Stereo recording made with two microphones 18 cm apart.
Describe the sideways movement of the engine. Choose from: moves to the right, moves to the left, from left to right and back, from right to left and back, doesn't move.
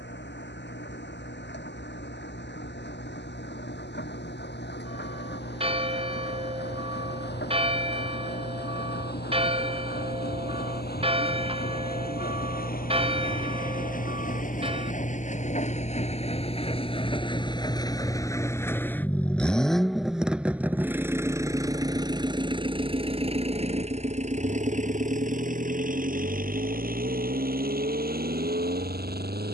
moves to the right.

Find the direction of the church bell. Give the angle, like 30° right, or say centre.
30° right.